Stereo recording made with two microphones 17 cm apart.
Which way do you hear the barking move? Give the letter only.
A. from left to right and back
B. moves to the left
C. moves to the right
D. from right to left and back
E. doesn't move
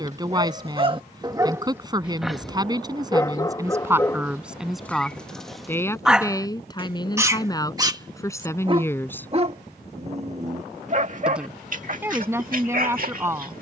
D.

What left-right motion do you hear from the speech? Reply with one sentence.
You can hear the speech move from right to left and back again.